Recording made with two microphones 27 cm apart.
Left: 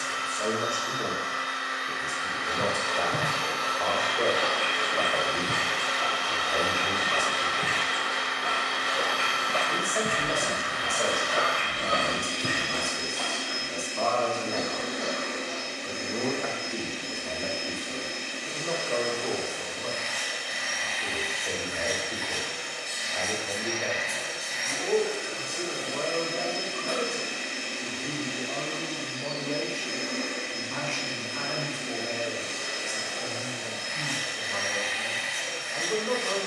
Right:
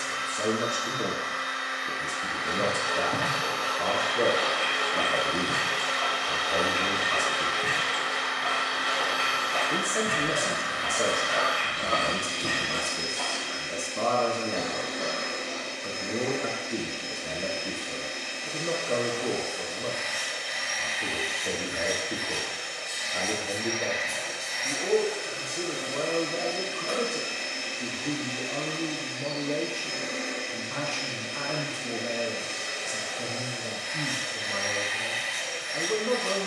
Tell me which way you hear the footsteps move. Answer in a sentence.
In this clip you hear the footsteps move from right to left and back again.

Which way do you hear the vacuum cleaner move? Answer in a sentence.
You can hear the vacuum cleaner stay put.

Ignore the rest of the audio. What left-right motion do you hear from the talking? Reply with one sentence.
In this clip you hear the talking stay put.